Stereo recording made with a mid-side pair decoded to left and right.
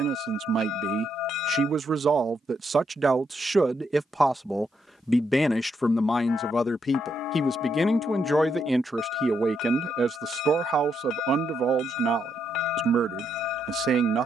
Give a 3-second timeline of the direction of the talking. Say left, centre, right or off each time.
right, centre, centre, right, right.